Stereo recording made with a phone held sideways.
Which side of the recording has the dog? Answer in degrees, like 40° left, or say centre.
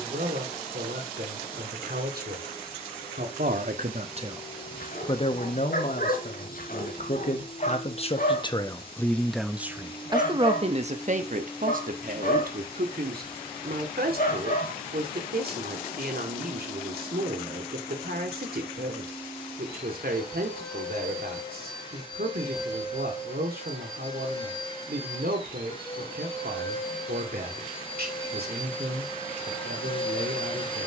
60° left.